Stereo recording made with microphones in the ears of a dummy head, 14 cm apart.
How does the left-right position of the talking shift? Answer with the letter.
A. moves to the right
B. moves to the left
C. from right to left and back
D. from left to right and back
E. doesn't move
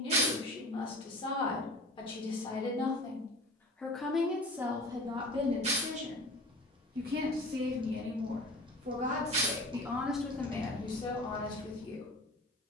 D.